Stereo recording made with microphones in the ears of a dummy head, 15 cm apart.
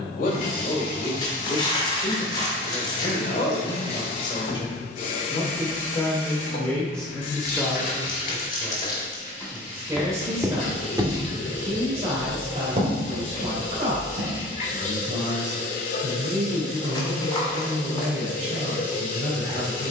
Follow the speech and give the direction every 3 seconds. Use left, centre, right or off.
left, left, centre, right, right, right, right.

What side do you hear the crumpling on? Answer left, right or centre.
left.